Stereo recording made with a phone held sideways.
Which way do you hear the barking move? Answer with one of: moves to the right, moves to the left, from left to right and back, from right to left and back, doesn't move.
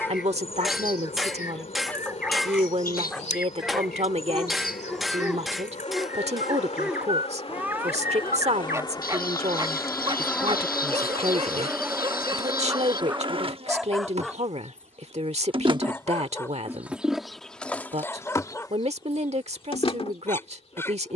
from left to right and back.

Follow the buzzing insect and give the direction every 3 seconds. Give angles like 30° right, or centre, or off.
50° left, 50° left, 40° left, 10° left, 30° right, 10° right, 30° left.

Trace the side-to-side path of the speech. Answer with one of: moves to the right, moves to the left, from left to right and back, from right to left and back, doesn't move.
doesn't move.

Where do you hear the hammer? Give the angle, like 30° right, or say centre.
centre.